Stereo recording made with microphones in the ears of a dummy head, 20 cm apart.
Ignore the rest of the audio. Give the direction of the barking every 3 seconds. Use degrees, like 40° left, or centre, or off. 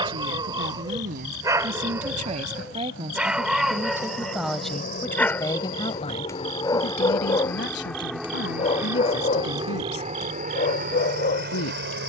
20° right, centre, 20° left, 40° left.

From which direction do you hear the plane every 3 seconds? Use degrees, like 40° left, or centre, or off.
60° left, 40° left, 10° left, 30° right.